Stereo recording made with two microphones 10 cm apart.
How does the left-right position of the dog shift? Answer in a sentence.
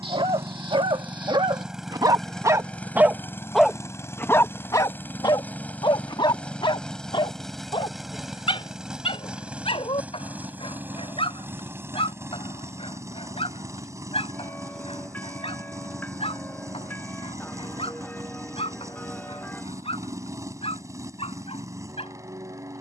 In this clip you hear the dog travel towards the left.